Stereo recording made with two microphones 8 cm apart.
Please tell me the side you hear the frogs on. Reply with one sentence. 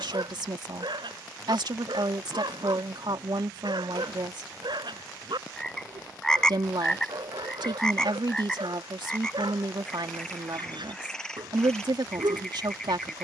In this clip you hear the frogs in the centre.